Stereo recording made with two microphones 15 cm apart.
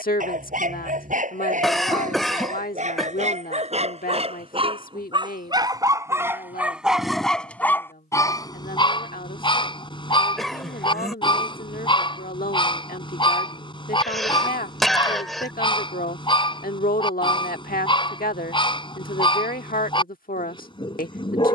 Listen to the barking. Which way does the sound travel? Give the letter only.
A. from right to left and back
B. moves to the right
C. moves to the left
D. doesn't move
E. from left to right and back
C.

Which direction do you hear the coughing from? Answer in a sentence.
In this clip you hear the coughing in the centre.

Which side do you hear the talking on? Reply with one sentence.
You can hear the talking on the left.